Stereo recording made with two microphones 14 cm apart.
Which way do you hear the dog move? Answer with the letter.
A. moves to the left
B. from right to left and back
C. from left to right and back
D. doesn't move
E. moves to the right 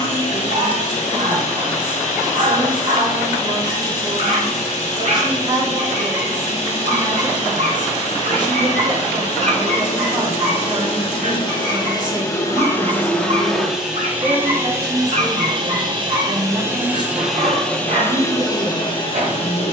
D.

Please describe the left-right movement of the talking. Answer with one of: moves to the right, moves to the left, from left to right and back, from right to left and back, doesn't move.
doesn't move.